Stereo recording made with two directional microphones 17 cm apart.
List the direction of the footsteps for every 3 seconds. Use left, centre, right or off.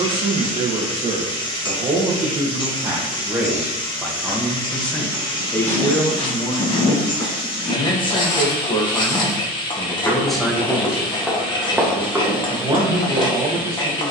off, left, left, centre, right.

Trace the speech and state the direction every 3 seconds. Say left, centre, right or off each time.
right, centre, left, centre, right.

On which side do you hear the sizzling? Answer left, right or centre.
left.